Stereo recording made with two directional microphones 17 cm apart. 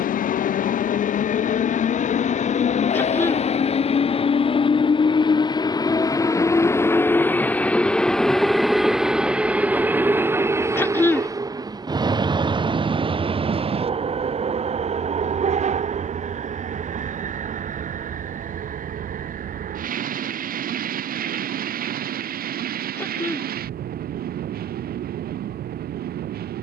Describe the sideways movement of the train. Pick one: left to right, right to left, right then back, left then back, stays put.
left to right.